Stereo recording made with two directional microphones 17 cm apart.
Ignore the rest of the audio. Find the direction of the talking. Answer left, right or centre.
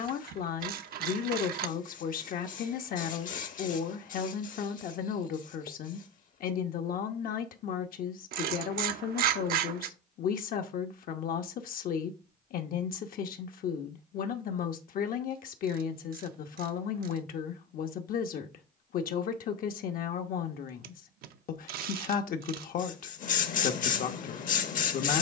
left.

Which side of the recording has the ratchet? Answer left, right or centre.
right.